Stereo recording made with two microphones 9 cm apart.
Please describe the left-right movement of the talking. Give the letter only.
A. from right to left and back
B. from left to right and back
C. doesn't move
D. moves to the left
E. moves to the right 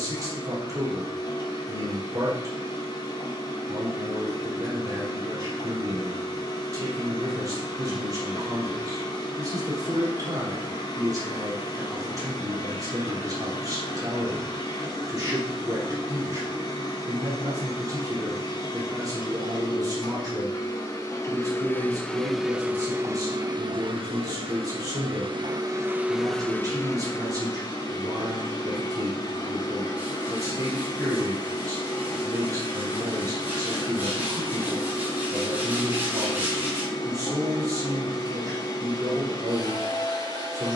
C.